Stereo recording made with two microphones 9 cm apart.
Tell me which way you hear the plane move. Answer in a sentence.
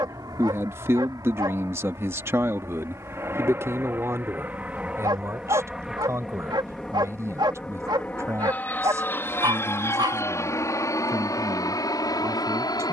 You can hear the plane go from the right side to the left.